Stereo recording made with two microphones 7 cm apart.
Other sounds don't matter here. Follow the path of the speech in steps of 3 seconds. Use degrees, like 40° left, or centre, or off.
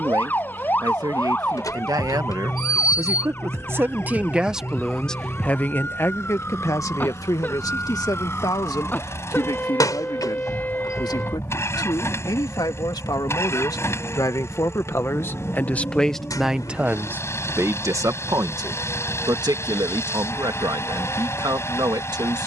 60° right, 10° right, 50° left, 70° left, 60° left, 10° right, 60° right, 70° right.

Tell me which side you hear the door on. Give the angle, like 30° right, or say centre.
50° left.